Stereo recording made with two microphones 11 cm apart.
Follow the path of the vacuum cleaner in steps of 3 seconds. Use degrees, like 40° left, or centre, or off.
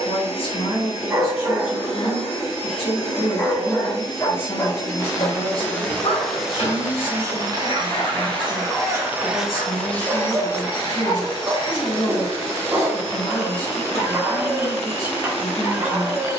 60° left, 30° left, 30° right, 20° left, 60° left, 60° left.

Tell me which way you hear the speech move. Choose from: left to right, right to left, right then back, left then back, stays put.
stays put.